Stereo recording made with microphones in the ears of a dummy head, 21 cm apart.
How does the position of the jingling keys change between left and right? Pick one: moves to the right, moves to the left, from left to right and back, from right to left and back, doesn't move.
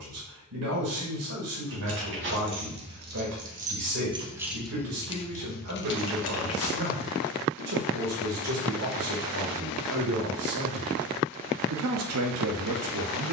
moves to the left.